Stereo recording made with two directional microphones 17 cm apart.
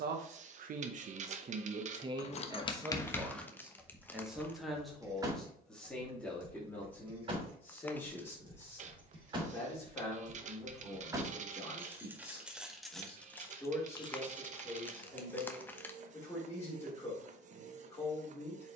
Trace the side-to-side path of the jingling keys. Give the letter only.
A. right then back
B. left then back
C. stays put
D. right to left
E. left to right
A.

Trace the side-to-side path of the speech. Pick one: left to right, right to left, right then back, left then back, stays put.
right to left.